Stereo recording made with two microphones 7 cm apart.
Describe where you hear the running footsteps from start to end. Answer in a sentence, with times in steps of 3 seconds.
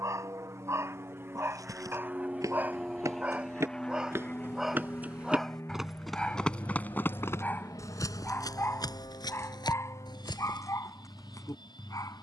You can hear the running footsteps on the right from 0 s and on the left from 6 s.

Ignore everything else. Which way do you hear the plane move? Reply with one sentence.
You can hear the plane move from right to left.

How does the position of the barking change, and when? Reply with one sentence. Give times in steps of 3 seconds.
You can hear the barking on the right from 0 s, in the centre from 3 s and on the left from 6 s.